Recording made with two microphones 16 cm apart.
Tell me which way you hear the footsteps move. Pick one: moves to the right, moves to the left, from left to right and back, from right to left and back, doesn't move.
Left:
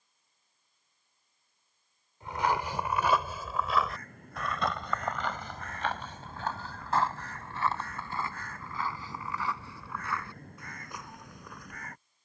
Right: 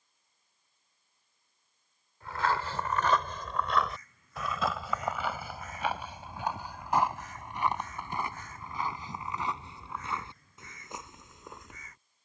moves to the right.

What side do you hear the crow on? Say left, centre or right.
left.